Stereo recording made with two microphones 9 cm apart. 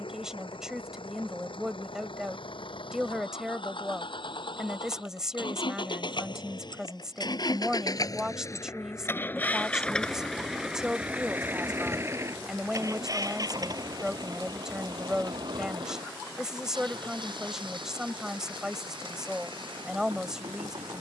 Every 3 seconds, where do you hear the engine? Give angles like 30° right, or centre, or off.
80° left, 70° left, 50° left, centre, 40° right, 60° right, 70° right.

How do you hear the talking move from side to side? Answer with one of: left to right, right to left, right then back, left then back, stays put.
stays put.